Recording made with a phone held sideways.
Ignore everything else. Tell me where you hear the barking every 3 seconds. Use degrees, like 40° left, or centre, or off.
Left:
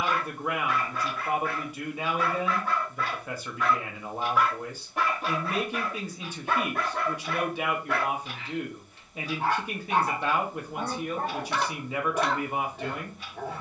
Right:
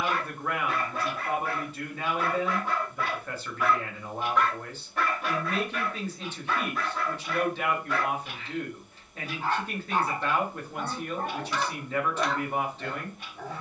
30° right, 20° left, 60° left, 60° left, 60° left.